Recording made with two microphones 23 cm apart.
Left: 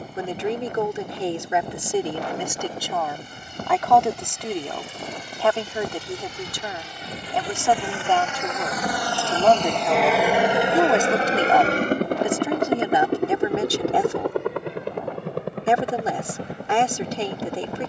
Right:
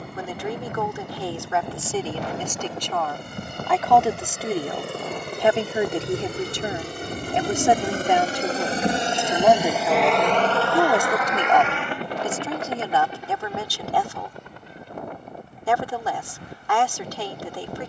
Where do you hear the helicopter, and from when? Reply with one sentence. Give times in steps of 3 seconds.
In this clip you hear the helicopter on the right from 0 s, in the centre from 9 s and on the left from 12 s.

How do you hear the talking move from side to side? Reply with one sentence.
You can hear the talking go right and come back.